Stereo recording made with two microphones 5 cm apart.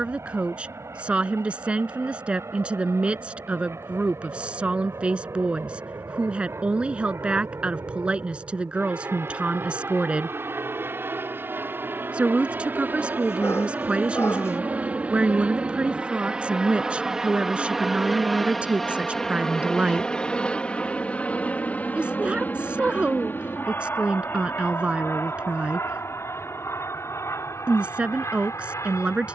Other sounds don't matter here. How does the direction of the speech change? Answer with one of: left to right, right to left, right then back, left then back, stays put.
stays put.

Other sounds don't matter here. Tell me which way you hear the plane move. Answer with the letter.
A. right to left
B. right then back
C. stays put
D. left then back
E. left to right
A.